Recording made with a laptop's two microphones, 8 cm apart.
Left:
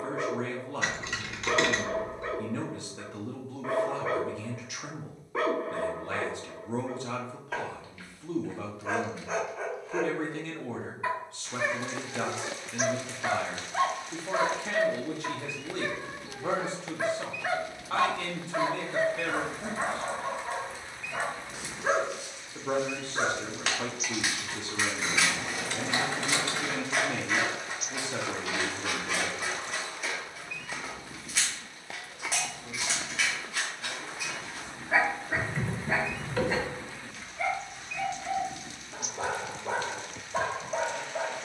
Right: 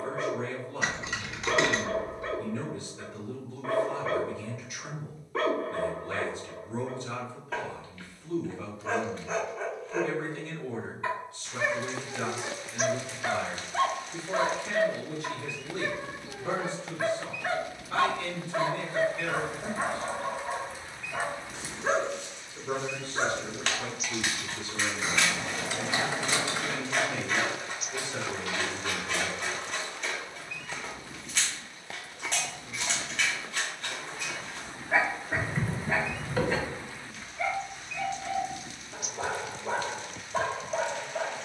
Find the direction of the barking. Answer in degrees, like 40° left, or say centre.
10° left.